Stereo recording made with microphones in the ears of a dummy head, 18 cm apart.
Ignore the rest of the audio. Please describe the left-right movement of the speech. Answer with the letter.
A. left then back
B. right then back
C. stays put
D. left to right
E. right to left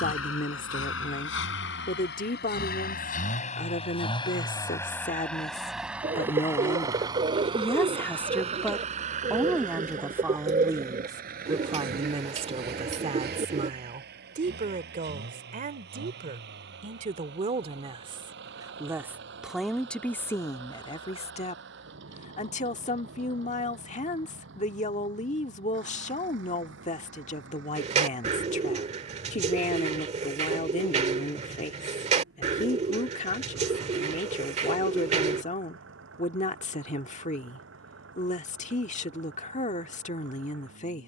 B.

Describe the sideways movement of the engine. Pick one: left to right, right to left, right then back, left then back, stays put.
left to right.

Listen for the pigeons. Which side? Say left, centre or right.
right.